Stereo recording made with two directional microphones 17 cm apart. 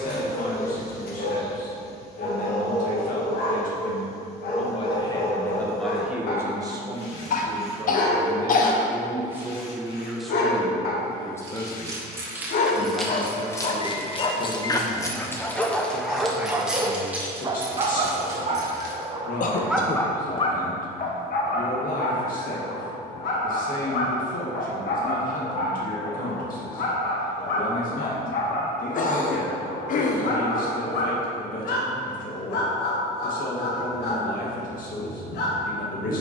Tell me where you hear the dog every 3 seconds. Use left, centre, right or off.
left, left, left, left, left, centre, centre, left, left, left, left, left.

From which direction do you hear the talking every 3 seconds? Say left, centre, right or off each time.
left, left, right, centre, left, left, left, left, left, left, left, left.